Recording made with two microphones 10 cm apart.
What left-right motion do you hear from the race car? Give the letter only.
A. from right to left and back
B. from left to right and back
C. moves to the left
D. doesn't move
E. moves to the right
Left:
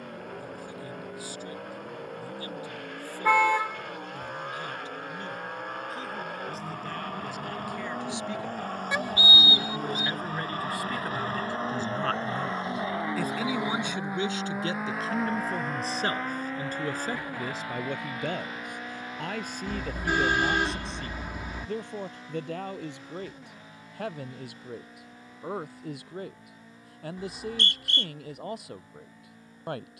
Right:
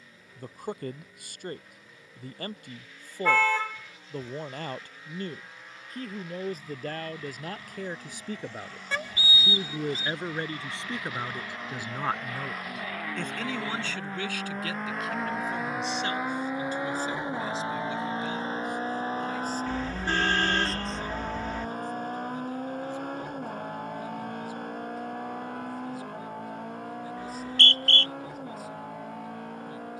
E.